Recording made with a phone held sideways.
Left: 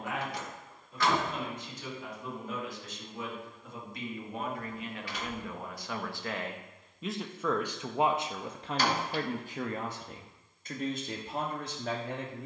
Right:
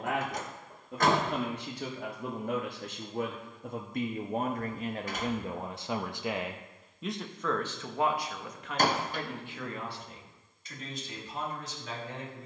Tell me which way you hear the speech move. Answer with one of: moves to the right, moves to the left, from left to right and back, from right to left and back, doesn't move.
moves to the left.